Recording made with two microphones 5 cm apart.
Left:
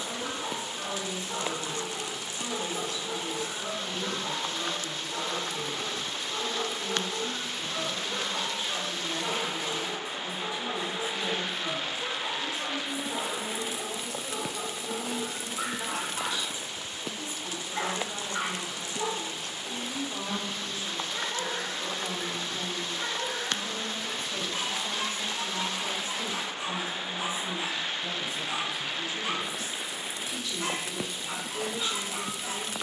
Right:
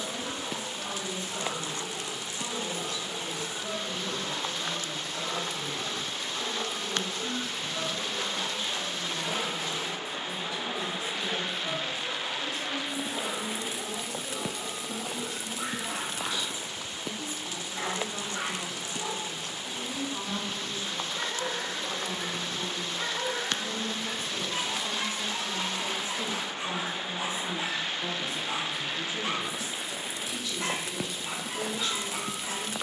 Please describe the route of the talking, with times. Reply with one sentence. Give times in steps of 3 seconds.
You can hear the talking on the left from 0 s, in the centre from 21 s, on the right from 24 s and in the centre from 30 s.